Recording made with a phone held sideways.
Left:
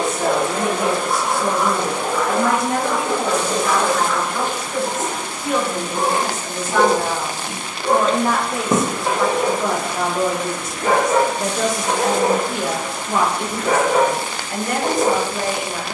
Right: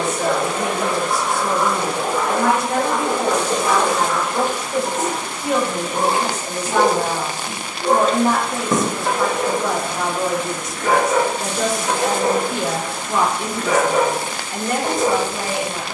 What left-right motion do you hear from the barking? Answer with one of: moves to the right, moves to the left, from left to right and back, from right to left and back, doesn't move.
from left to right and back.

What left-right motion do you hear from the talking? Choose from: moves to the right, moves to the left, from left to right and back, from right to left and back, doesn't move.
from left to right and back.